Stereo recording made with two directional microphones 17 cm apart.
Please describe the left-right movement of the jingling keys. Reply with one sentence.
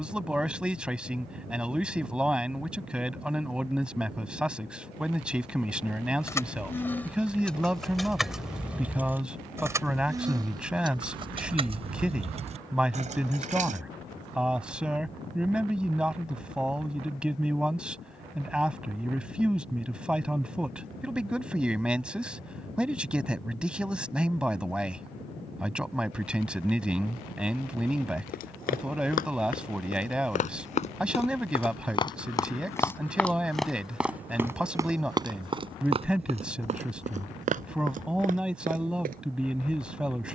You can hear the jingling keys move to the right.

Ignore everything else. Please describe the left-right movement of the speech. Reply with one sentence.
In this clip you hear the speech stay put.